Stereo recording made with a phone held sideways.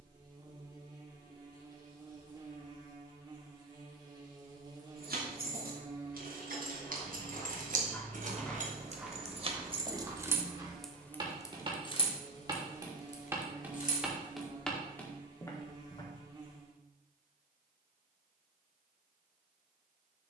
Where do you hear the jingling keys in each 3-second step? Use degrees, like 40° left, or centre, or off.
off, 70° right, 60° right, 20° right, 50° left, off, off.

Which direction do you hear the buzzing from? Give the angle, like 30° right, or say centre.
30° right.